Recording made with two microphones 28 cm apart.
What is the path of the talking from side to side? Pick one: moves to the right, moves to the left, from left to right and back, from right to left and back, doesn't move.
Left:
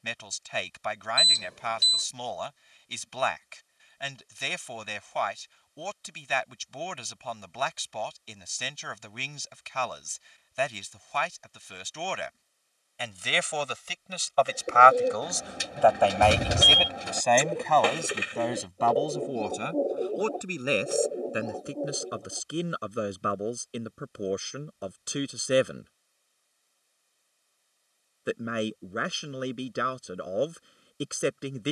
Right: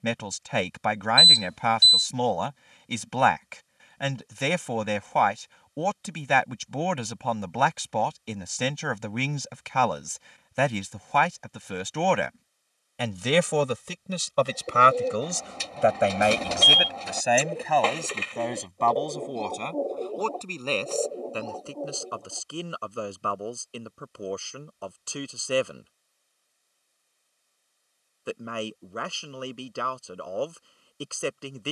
moves to the left.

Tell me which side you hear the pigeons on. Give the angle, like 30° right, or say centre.
10° left.